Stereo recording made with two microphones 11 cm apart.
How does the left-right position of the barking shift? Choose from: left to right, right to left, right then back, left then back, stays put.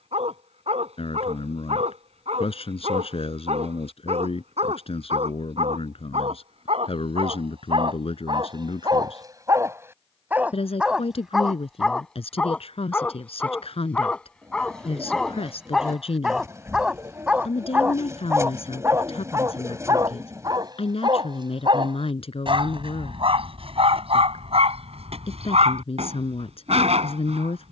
left then back.